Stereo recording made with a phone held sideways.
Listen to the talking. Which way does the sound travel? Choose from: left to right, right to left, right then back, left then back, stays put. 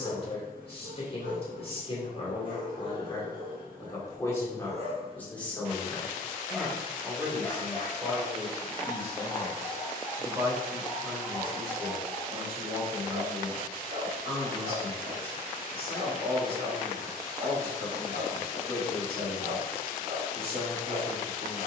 left to right.